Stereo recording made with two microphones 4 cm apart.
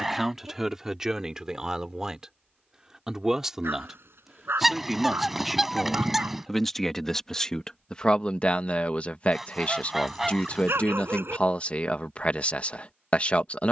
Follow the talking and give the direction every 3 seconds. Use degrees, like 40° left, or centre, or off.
10° right, 10° right, 20° left, 30° left, 30° left.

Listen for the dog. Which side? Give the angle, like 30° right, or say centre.
70° right.